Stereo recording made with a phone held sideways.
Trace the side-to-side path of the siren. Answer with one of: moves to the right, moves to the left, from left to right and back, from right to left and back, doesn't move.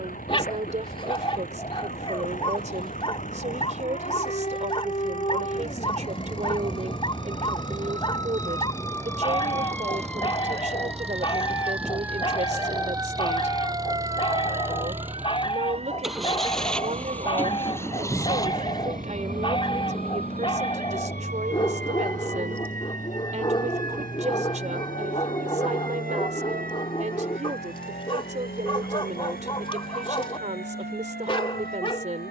moves to the right.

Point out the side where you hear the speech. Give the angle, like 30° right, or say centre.
50° right.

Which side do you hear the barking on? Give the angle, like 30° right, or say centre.
30° left.